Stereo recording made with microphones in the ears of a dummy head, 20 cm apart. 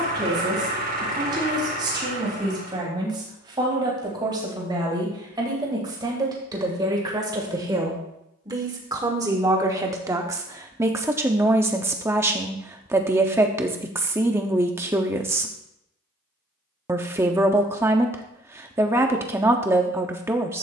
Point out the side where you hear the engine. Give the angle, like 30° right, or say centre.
40° right.